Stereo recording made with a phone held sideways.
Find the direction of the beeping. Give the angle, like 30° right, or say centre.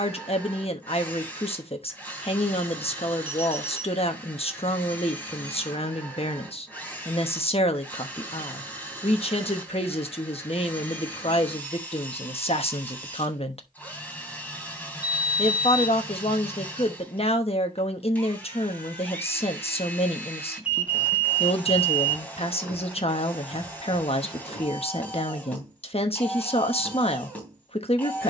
10° right.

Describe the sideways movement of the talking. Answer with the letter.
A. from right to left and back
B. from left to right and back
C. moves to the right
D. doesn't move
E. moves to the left
D.